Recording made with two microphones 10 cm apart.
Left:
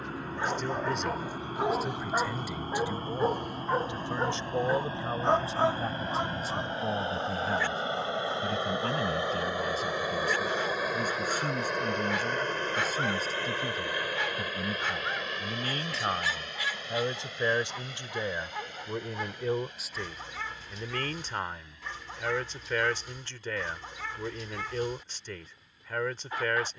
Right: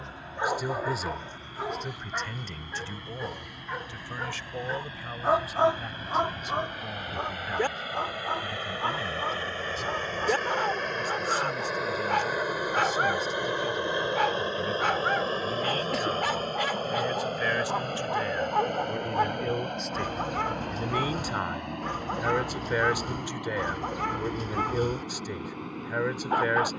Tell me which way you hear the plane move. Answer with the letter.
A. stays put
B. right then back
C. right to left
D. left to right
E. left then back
D.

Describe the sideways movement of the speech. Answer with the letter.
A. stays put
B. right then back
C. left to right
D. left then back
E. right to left
D.